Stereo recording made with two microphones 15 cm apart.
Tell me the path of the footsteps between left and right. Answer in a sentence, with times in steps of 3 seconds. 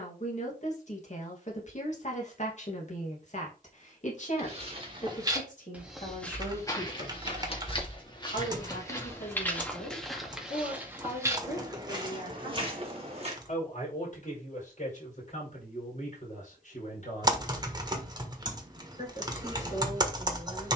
In this clip you hear the footsteps not at all from 0 s, on the right from 3 s, on the left from 6 s, in the centre from 9 s, on the right from 12 s and not at all from 15 s.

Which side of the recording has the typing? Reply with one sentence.
You can hear the typing on the right.